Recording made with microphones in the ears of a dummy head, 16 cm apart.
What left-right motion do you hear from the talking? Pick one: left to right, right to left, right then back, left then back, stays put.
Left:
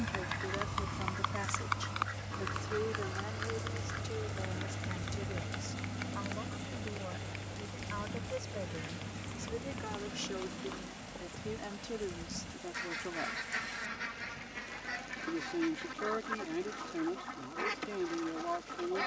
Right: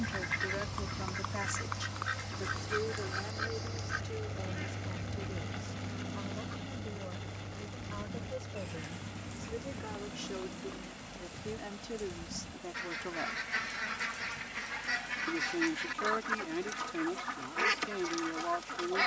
left then back.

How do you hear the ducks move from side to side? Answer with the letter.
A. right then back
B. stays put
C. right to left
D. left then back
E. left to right
D.